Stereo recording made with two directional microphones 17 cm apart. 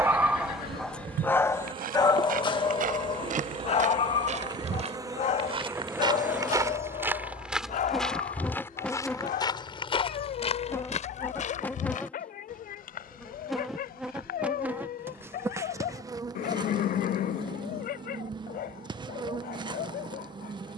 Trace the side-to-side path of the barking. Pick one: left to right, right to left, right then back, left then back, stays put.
right to left.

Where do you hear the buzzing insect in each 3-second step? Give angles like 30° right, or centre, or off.
30° right, 20° right, centre, 10° left, centre, 20° right, 30° right.